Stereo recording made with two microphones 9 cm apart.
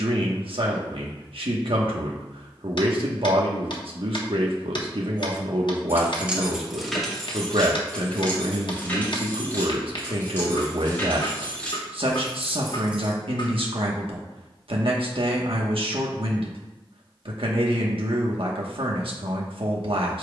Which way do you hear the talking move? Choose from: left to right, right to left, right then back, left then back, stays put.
stays put.